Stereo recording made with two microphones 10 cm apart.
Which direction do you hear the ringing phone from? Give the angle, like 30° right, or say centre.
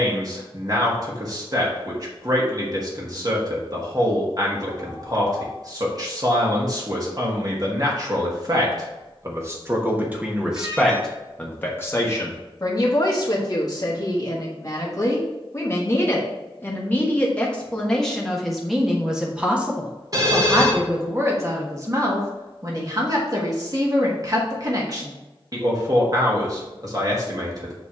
40° right.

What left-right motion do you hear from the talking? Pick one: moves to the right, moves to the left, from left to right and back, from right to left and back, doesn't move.
from right to left and back.